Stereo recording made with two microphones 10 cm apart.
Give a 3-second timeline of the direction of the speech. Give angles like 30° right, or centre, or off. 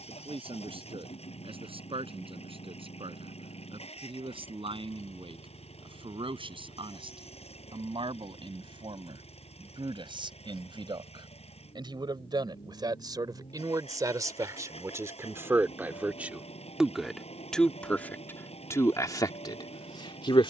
60° right, 60° right, 60° right, 50° right, 40° right, 10° right, 40° left.